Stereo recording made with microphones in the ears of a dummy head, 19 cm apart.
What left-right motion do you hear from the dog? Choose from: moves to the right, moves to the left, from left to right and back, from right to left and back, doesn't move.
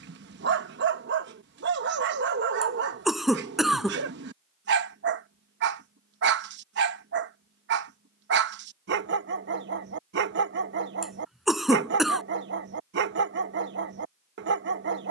doesn't move.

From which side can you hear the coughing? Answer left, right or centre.
centre.